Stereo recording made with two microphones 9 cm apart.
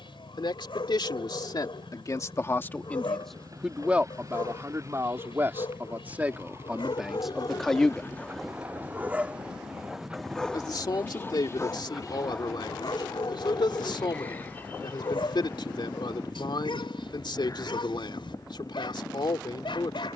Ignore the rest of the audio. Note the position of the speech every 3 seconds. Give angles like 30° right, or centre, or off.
50° left, 20° right, centre, 60° left, 70° left, 70° left, 70° left.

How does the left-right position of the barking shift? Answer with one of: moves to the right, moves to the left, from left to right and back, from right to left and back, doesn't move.
from left to right and back.